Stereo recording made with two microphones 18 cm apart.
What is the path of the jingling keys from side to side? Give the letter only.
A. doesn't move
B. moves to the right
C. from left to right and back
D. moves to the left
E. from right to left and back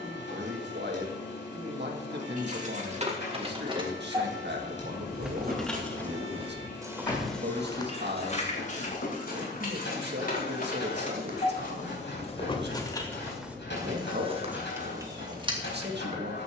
E.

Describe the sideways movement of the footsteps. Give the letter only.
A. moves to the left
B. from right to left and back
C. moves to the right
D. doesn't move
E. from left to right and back
B.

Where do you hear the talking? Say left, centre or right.
right.